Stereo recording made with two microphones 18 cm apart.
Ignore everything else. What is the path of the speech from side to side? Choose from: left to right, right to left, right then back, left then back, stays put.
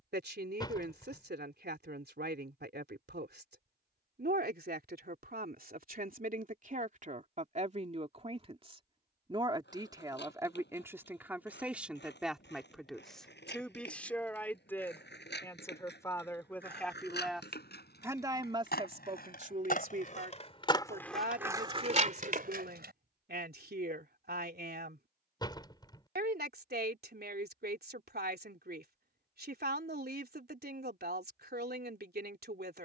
left then back.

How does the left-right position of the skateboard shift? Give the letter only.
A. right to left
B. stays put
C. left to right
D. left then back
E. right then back
C.